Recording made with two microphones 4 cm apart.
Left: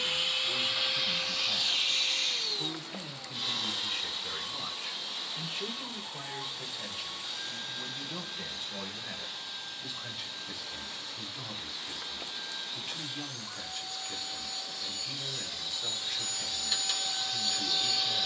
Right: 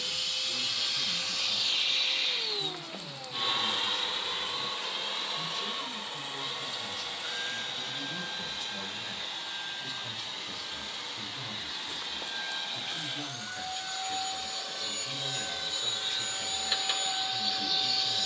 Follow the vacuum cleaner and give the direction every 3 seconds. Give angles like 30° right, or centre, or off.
centre, 50° right, 70° right, 80° right, 70° right, 40° right.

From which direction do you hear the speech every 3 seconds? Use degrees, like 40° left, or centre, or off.
70° left, 50° left, 20° left, centre, 10° right, 10° right.